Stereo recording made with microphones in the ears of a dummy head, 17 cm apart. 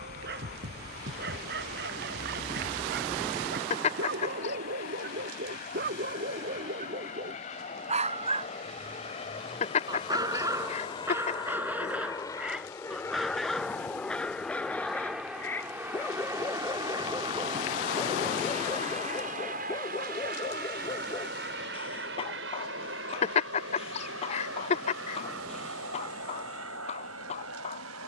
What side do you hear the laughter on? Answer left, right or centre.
left.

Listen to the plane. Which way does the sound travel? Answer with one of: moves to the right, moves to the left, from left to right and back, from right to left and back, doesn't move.
moves to the right.